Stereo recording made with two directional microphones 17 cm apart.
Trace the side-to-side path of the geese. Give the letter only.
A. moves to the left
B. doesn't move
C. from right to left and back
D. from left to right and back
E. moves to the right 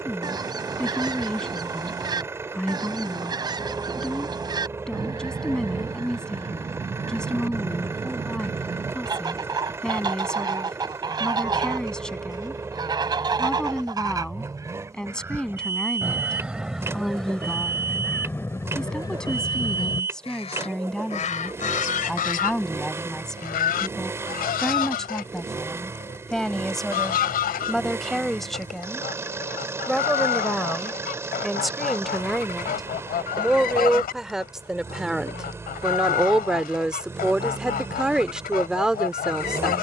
A.